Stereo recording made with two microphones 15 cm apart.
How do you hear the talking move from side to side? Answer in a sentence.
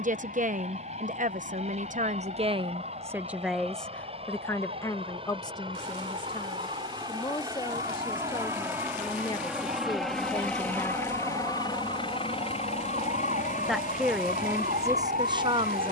You can hear the talking move from right to left and back again.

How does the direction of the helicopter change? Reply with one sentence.
In this clip you hear the helicopter go from the right side to the left.